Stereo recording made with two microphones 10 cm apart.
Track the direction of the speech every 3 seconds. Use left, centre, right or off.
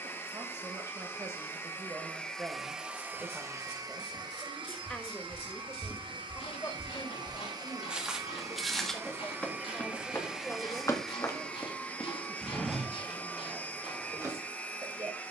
right, centre, left, centre, right.